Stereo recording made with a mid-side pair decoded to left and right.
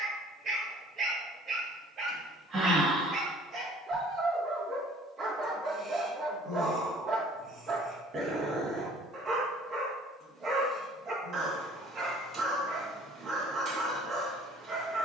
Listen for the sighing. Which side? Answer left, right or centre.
right.